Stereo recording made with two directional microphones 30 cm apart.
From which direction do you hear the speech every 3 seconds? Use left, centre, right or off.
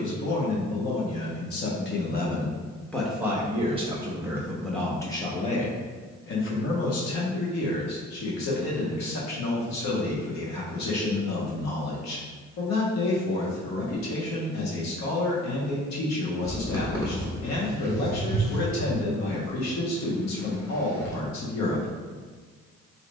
left, centre, left, left, left, left, left, left.